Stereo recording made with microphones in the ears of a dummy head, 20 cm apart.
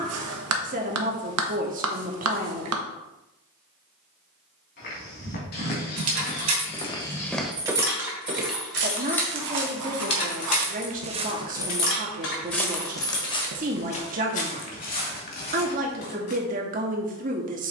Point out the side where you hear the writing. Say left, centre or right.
right.